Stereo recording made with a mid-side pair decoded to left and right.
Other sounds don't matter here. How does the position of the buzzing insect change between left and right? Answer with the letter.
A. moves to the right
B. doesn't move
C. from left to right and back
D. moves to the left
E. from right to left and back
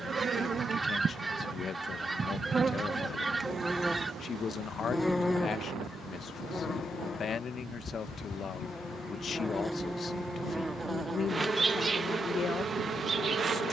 E.